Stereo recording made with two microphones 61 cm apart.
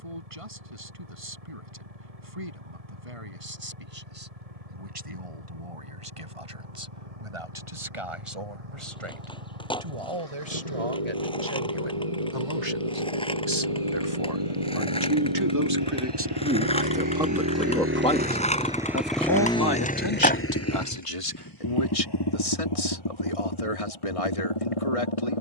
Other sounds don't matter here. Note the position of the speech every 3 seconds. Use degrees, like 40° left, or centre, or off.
60° right, 60° right, 60° right, 50° right, 40° right, 10° right, 40° left, 60° left, 70° left.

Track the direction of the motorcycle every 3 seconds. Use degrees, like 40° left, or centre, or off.
80° right, 80° right, 80° right, 70° right, 60° right, 40° right, 10° left, 40° left, 60° left.